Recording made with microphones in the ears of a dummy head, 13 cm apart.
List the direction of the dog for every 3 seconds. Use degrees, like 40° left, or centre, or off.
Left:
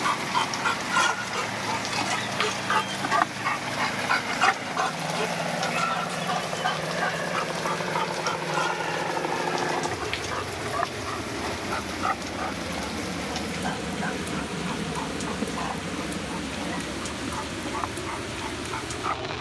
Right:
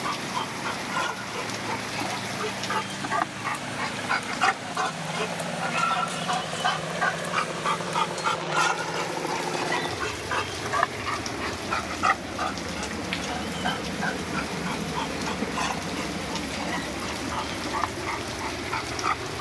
40° left, 10° left, 30° right, 60° right, 70° right, 80° right, 80° right.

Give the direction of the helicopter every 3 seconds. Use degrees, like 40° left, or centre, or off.
70° left, 70° left, 60° left, 50° left, 20° left, 20° right, 50° right.